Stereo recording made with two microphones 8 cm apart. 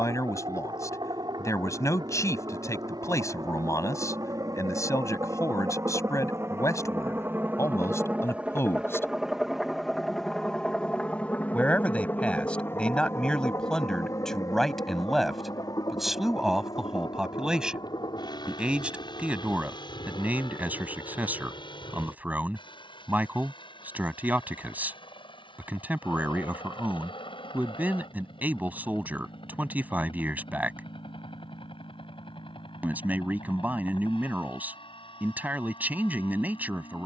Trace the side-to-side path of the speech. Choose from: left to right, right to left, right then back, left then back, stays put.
left to right.